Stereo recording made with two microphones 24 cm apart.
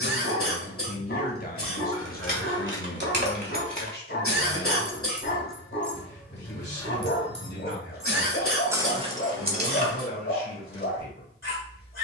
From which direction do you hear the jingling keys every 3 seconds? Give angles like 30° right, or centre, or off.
50° right, 20° right, 10° left, 40° right.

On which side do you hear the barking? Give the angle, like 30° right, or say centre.
60° left.